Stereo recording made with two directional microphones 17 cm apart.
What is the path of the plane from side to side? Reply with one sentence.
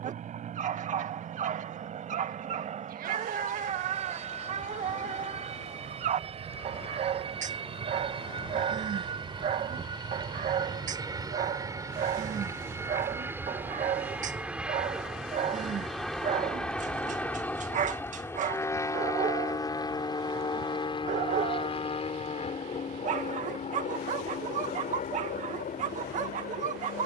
In this clip you hear the plane go from the right side to the left.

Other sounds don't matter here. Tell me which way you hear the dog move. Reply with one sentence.
You can hear the dog stay put.